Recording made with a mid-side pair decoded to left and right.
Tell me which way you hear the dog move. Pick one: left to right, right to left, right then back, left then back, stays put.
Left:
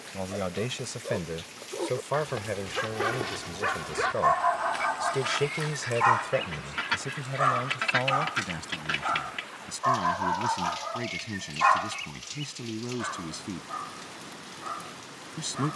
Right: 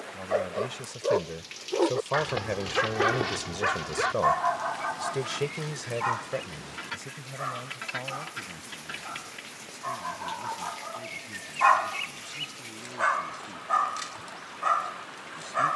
left then back.